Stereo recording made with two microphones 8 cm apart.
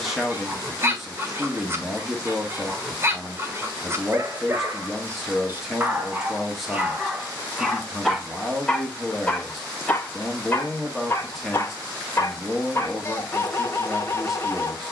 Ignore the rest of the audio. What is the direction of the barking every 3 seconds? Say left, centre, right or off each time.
right, right, centre, left, left.